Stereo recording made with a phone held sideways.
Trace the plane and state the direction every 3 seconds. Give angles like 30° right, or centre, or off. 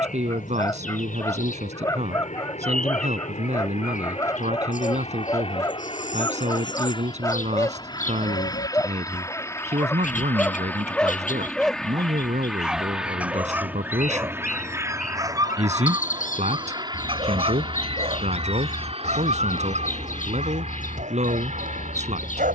50° left, 40° left, 30° left, 10° left, 10° right, 20° right, 40° right, 40° right.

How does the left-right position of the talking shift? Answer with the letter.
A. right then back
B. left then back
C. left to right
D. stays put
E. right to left
D.